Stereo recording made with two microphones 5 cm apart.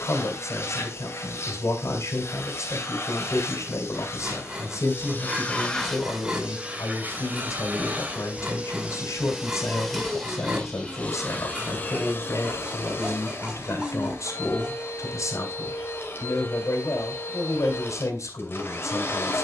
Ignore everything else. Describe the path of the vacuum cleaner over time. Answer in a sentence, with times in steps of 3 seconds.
In this clip you hear the vacuum cleaner on the left from 0 s, on the right from 6 s, in the centre from 9 s and on the left from 12 s.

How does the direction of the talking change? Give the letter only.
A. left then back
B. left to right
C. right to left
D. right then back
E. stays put
E.